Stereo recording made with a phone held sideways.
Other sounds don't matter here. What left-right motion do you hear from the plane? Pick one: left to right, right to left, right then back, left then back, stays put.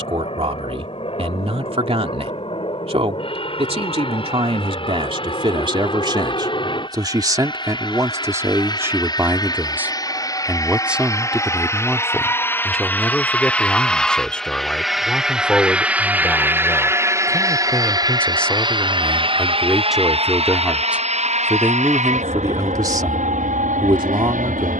left to right.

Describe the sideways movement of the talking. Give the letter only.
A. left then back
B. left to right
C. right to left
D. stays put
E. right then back
A.